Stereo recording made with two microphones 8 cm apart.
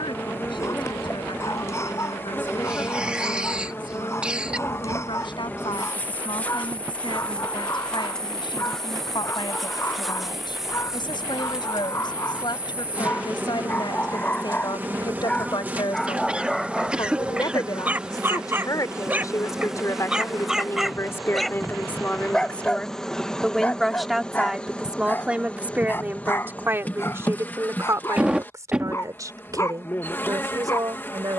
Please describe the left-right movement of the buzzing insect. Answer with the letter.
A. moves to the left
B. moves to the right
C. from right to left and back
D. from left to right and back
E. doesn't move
D.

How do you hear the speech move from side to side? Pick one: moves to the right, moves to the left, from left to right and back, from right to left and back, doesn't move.
moves to the right.